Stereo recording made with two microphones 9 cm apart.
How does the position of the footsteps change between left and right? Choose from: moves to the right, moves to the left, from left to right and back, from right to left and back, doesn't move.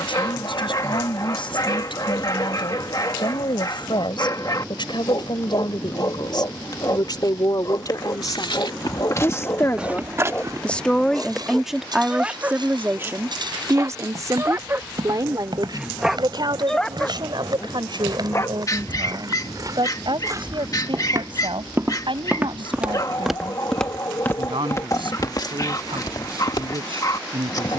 from left to right and back.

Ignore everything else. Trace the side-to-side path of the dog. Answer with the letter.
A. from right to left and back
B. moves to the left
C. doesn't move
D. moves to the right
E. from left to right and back
E.